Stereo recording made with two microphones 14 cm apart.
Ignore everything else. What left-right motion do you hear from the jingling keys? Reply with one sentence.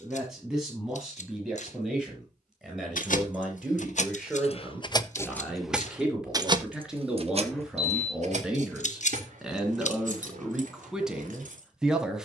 You can hear the jingling keys move from left to right.